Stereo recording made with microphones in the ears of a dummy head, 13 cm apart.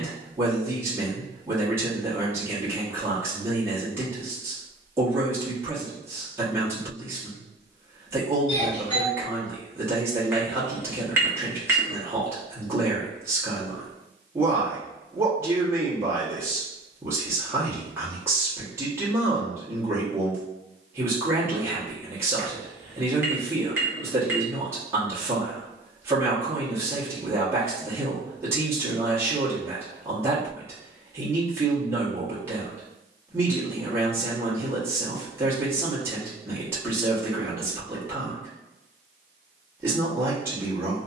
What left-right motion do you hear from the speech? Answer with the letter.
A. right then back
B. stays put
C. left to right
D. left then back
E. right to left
B.